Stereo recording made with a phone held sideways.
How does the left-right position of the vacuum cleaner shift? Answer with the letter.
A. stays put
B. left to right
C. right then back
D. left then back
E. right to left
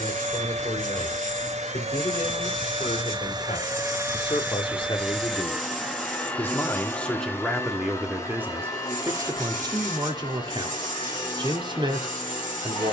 E.